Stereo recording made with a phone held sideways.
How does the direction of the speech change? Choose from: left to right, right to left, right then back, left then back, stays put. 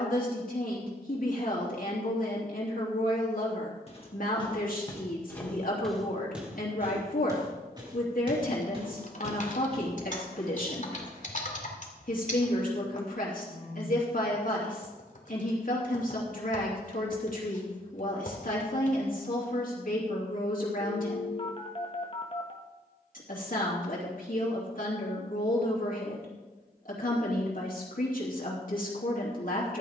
stays put.